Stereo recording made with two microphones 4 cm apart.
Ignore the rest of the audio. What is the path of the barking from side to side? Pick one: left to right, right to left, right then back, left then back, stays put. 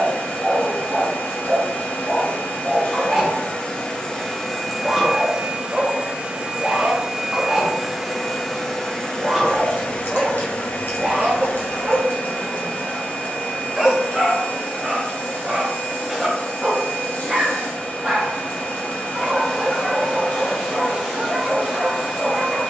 stays put.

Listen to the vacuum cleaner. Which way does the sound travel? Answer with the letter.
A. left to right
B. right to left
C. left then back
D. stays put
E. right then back
E.